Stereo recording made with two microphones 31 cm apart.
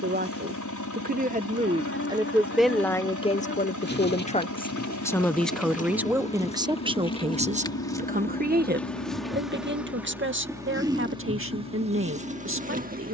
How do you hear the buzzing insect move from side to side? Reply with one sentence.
You can hear the buzzing insect travel towards the right.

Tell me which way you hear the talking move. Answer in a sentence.
You can hear the talking move from right to left and back again.